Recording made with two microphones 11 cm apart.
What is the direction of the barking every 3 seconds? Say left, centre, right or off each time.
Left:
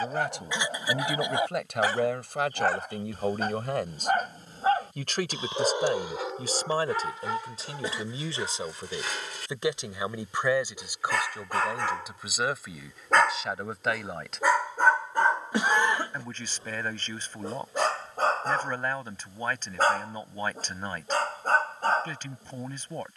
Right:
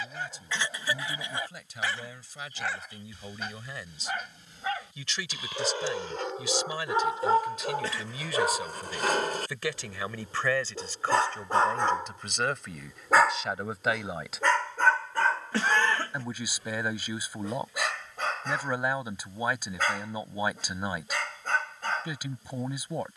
left, left, right, right, centre, left, left, left.